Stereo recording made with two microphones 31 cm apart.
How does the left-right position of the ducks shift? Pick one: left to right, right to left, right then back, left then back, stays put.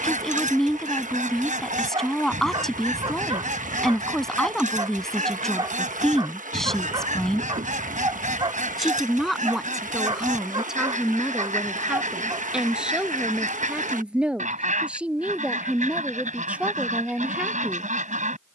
stays put.